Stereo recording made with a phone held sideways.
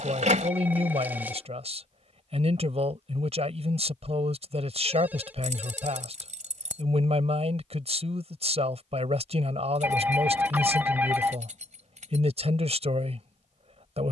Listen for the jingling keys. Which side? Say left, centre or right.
right.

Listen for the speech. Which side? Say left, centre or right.
right.